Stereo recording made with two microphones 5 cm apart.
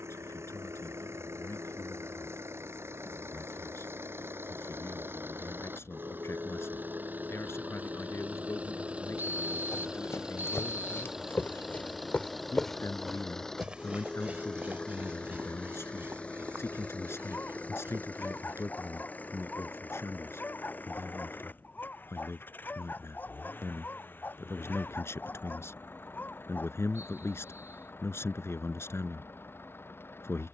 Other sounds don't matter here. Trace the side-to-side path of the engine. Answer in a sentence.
In this clip you hear the engine travel towards the left.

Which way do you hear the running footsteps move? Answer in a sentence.
In this clip you hear the running footsteps go from the left side to the right.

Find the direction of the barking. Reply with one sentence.
In this clip you hear the barking on the left.